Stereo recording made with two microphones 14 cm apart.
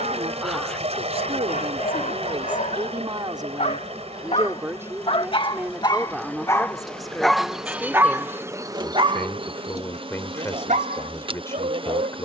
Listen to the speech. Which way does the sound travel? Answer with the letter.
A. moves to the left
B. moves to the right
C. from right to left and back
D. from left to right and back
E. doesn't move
A.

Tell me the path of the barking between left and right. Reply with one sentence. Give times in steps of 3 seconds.
You can hear the barking on the left from 0 s, in the centre from 6 s and on the right from 9 s.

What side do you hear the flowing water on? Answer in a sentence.
You can hear the flowing water on the right.